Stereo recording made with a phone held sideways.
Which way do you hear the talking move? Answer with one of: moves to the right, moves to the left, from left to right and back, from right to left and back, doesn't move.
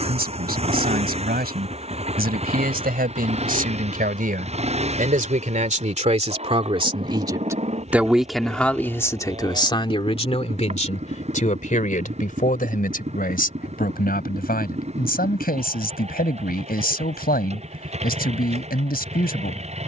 moves to the left.